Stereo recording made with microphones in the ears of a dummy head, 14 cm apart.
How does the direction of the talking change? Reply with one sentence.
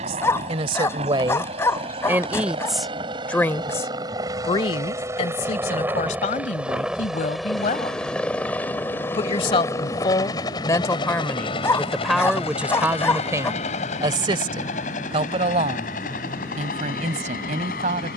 In this clip you hear the talking go left and come back.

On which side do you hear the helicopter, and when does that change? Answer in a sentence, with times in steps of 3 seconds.
In this clip you hear the helicopter on the right from 0 s, in the centre from 6 s and on the left from 9 s.